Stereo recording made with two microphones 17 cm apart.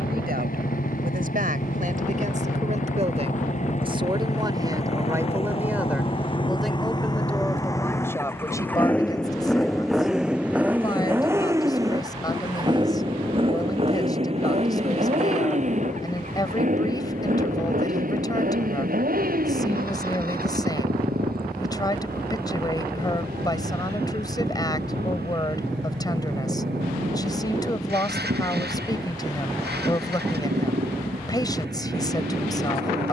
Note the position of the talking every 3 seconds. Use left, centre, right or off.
right, right, centre, left, left, left, left, left, left, left, left.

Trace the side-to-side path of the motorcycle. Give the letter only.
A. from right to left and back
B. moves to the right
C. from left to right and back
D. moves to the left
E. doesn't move
B.